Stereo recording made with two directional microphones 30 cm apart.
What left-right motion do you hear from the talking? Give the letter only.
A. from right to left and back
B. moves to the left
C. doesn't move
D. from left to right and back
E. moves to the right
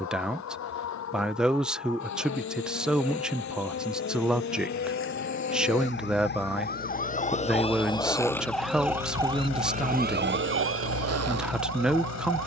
C.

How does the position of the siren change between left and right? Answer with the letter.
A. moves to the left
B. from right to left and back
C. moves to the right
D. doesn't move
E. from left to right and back
C.